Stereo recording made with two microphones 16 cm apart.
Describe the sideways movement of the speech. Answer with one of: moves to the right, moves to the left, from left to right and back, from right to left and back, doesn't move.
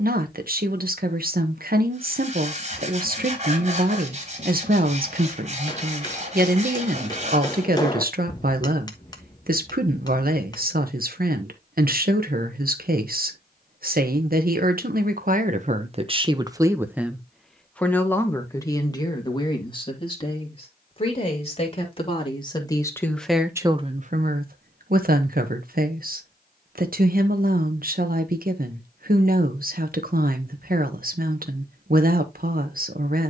from right to left and back.